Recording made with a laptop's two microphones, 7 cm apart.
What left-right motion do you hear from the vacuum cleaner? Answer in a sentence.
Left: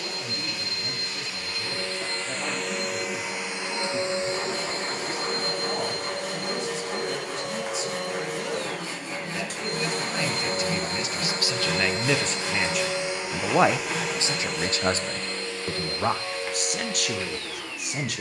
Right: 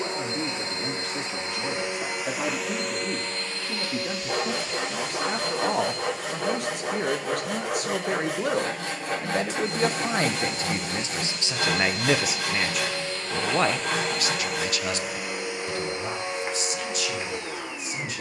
In this clip you hear the vacuum cleaner go left and come back.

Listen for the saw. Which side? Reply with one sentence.
You can hear the saw on the right.